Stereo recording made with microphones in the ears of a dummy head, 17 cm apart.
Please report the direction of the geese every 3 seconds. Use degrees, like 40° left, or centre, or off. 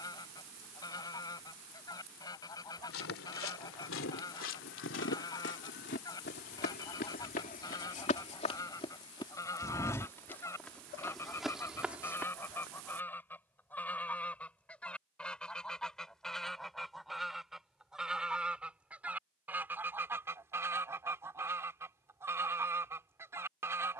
20° left, 20° left, 20° left, 10° left, 10° left, centre, 10° right, 10° right.